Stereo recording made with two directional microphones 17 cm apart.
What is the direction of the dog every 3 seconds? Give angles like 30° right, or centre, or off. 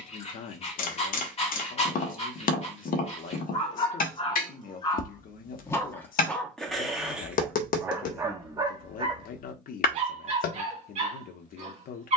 40° left, 30° left, 10° right, 40° right.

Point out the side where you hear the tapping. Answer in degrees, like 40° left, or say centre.
60° left.